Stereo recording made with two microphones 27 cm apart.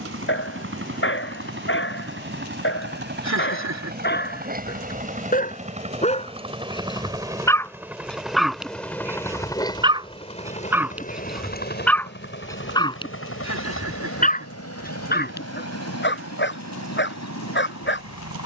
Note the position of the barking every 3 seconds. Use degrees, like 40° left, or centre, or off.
50° left, 40° left, 10° left, 10° right, 20° left, 40° left.